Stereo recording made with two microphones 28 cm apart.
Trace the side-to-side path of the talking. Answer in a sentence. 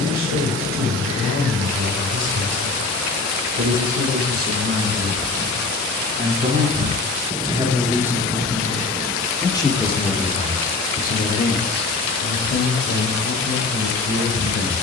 In this clip you hear the talking move to the left.